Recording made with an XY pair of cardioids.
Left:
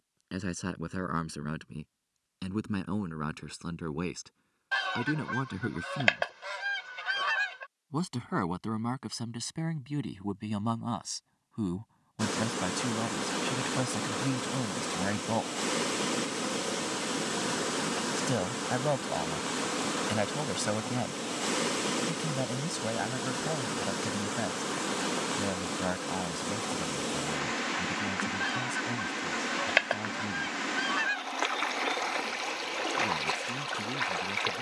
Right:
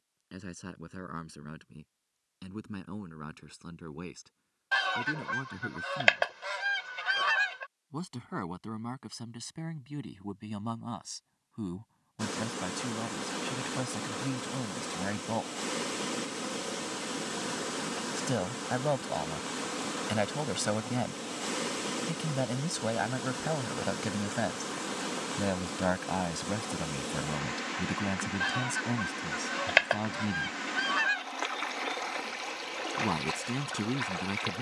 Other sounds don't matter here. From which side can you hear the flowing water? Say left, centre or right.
left.